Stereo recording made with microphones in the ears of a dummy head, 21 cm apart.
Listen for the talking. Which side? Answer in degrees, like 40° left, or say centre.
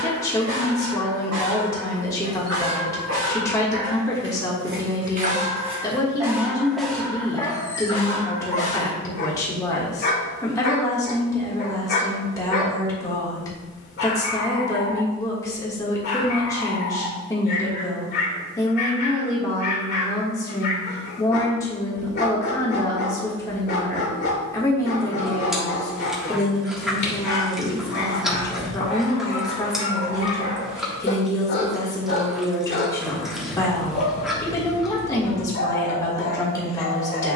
10° left.